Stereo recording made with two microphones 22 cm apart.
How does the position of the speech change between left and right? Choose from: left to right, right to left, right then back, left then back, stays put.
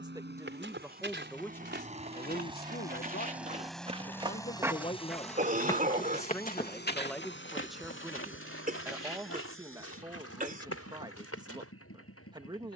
left then back.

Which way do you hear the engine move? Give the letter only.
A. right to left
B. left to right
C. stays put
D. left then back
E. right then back
A.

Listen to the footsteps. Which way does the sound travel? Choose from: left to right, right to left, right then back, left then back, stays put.
right to left.